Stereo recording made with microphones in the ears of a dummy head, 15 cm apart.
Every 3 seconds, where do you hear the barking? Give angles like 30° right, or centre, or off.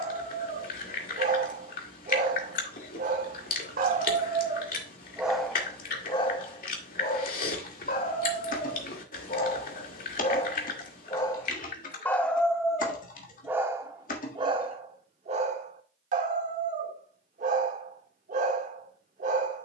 50° right, 30° right, 40° left, 30° left, 10° right, 50° right, 50° right.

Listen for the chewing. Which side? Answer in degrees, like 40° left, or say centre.
60° left.